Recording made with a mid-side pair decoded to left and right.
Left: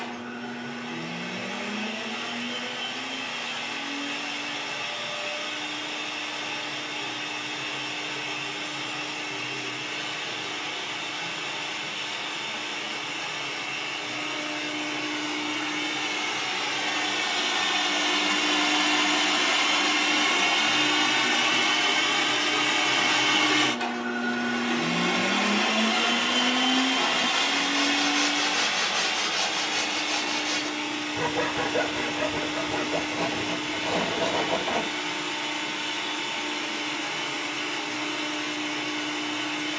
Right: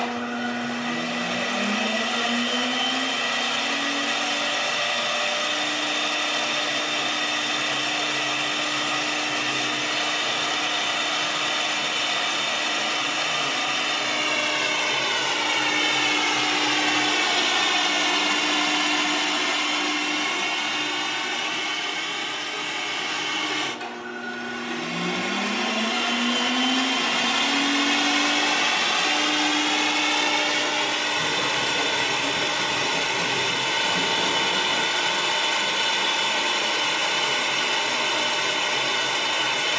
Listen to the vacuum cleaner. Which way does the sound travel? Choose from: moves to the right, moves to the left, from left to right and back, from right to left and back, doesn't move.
from right to left and back.